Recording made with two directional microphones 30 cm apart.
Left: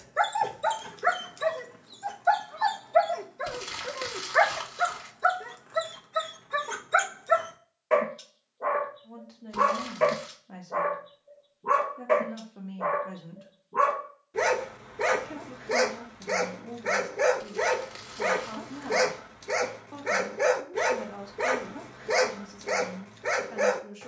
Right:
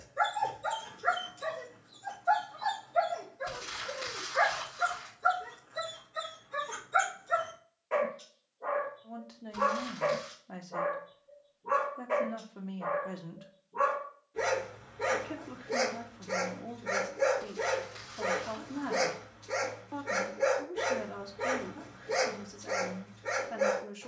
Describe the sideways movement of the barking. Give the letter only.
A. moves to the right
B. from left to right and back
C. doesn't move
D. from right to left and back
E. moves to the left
C.